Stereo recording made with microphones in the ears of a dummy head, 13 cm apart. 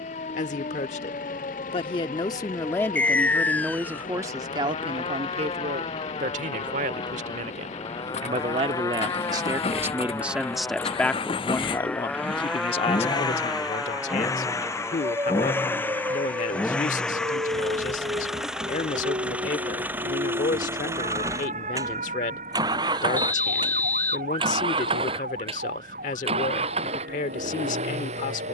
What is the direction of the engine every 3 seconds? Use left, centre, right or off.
left, left, left, left, left, centre, centre, right, right, right.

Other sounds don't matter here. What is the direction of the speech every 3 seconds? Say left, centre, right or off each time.
left, right, right, centre, left, left, left, left, left, left.